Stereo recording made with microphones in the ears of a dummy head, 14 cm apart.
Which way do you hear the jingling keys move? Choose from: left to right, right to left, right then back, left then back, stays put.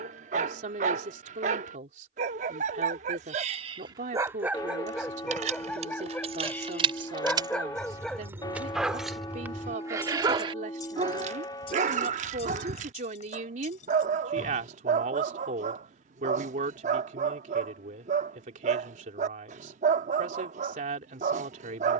right to left.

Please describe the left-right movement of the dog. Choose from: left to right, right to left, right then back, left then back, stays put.
left then back.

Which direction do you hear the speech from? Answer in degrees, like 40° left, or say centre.
50° right.